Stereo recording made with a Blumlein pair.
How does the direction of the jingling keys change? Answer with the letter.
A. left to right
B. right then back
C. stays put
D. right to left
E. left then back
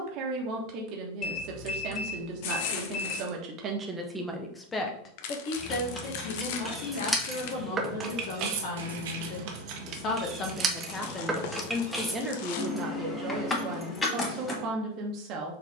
B.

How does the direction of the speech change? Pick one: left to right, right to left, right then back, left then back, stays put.
left then back.